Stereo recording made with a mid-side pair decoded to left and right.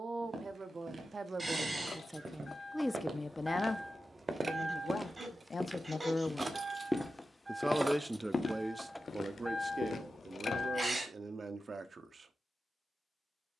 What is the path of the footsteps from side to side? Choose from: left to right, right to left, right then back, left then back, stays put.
right to left.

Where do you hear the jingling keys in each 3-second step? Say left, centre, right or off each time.
left, right, right, left, off.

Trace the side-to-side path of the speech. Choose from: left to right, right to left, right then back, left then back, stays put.
left then back.